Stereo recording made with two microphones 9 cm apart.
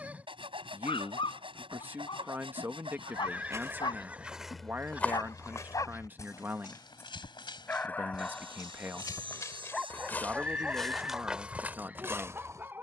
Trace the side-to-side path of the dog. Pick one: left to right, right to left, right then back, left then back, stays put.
left to right.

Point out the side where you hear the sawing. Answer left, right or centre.
right.